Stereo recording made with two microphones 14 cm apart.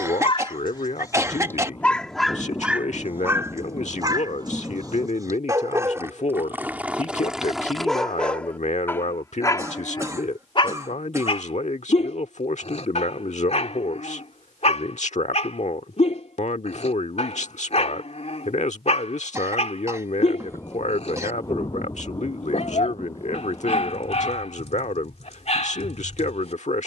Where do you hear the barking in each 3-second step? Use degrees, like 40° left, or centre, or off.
20° left, 30° right, centre, 40° left, 50° left, 50° left, 50° left, 50° left, 50° left.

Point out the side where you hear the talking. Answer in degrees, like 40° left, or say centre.
60° left.